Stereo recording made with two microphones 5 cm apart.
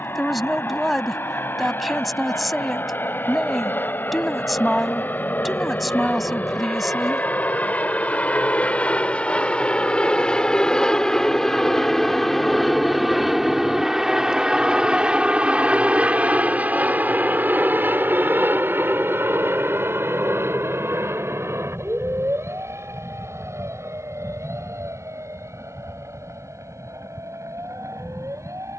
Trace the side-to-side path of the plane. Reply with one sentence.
In this clip you hear the plane move to the right.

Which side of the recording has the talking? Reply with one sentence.
You can hear the talking in the centre.